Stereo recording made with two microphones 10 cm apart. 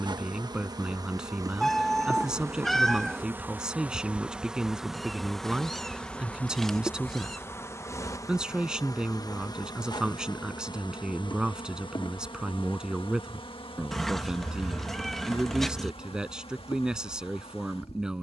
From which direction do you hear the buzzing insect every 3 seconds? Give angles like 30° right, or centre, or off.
30° right, 10° right, 20° left, 50° left, 60° left, 70° left.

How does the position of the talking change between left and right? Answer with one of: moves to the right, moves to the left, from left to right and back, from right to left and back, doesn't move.
doesn't move.